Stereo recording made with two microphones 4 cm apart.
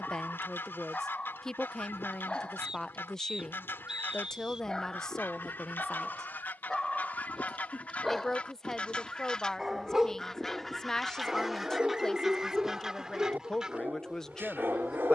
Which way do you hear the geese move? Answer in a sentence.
You can hear the geese go from the left side to the right.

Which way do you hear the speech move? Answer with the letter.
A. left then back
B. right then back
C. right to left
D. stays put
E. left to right
D.